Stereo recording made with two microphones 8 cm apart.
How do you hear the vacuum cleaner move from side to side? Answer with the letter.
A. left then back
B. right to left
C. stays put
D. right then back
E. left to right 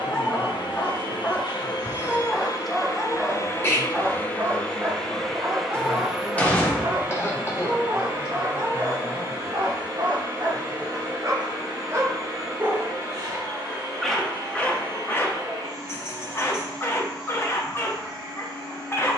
E.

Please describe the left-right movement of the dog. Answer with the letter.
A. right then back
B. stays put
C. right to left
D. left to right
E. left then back
A.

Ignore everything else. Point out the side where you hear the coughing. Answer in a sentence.
In this clip you hear the coughing on the left.